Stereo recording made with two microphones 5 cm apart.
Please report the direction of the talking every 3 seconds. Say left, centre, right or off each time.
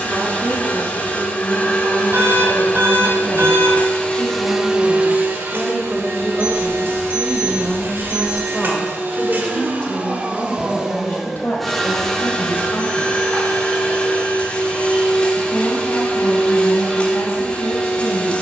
right, right, centre, left, left, left.